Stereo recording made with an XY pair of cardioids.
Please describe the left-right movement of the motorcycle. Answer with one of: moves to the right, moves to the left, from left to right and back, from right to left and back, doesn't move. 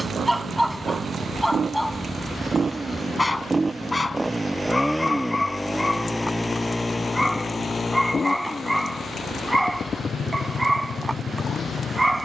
moves to the left.